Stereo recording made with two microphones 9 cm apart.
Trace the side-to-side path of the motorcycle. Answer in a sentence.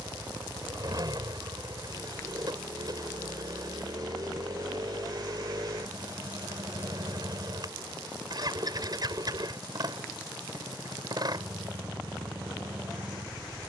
You can hear the motorcycle stay put.